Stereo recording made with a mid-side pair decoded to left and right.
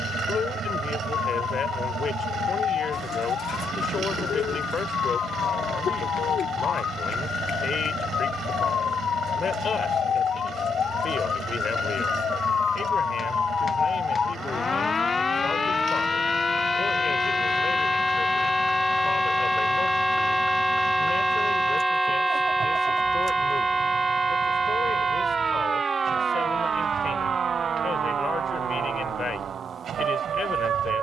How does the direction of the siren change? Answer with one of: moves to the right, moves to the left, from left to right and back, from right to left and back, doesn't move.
moves to the right.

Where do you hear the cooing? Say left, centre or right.
left.